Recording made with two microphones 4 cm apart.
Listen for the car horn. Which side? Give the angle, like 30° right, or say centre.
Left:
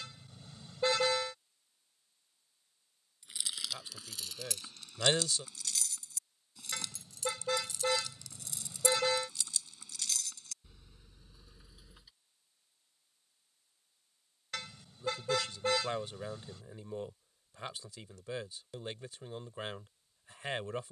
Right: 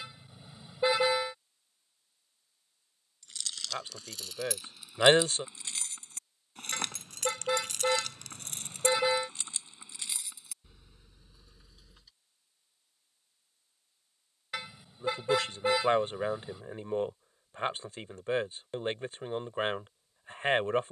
10° right.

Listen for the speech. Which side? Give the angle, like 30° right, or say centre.
40° right.